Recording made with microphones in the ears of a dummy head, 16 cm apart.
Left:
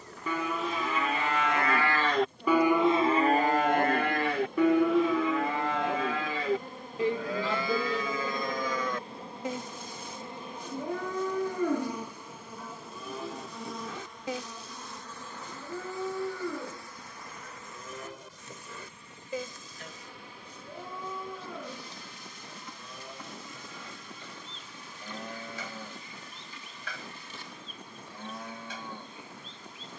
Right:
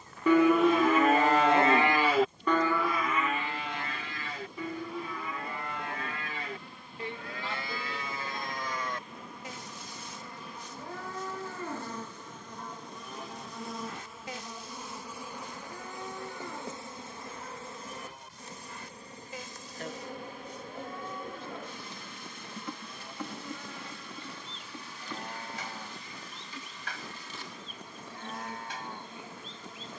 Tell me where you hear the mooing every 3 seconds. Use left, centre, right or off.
right, left, left, left, left, left, left, left, left, left.